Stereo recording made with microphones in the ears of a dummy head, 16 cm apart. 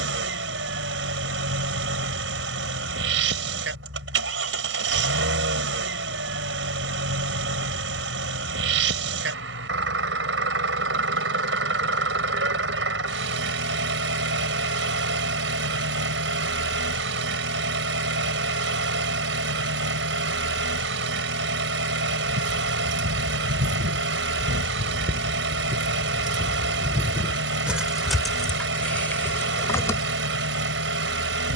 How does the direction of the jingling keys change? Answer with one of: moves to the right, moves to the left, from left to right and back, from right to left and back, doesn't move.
moves to the left.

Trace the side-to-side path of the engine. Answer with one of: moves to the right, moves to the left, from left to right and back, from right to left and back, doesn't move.
doesn't move.